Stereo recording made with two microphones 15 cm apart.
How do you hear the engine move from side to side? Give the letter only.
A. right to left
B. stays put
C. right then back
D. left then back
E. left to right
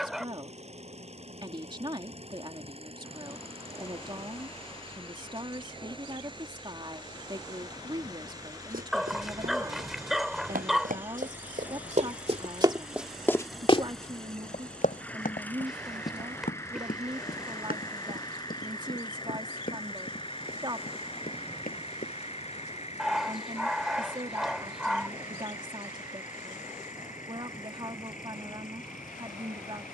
A.